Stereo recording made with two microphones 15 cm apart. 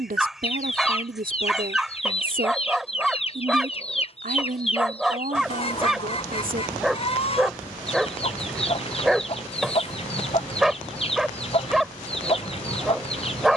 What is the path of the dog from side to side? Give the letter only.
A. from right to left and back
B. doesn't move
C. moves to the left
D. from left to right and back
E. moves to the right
B.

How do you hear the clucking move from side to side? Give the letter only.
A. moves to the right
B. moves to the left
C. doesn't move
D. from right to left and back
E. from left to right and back
C.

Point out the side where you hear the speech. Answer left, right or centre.
right.